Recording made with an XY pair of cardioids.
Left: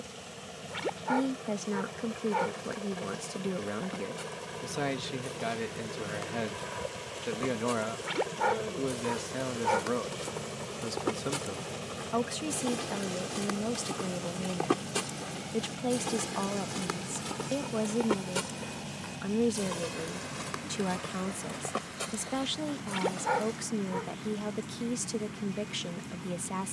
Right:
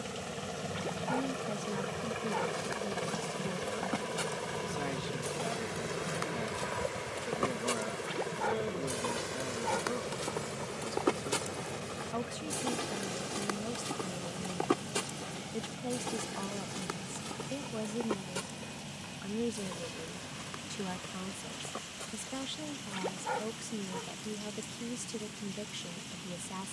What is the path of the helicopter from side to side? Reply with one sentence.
You can hear the helicopter move from right to left.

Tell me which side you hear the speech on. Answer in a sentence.
In this clip you hear the speech on the left.